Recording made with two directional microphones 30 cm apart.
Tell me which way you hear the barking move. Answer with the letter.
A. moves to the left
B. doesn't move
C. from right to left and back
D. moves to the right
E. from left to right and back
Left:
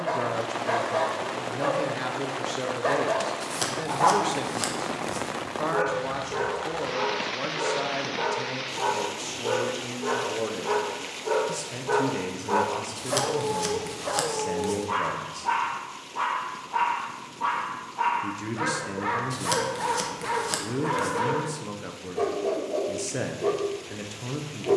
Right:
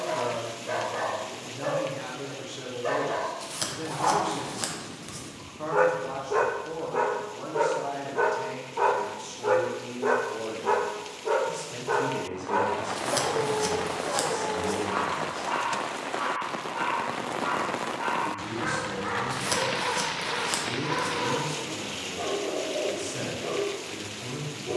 E.